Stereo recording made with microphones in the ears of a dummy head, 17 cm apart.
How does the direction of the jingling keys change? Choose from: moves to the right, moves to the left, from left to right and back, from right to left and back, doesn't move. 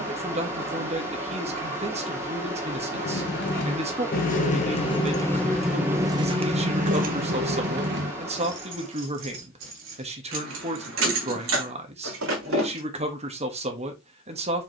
moves to the right.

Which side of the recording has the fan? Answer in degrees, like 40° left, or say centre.
10° right.